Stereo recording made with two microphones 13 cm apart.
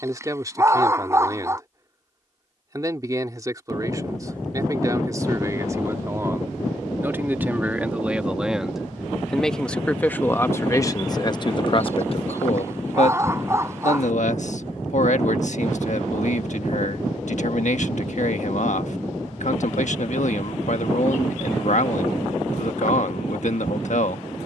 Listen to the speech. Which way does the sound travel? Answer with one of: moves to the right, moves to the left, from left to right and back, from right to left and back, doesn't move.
moves to the left.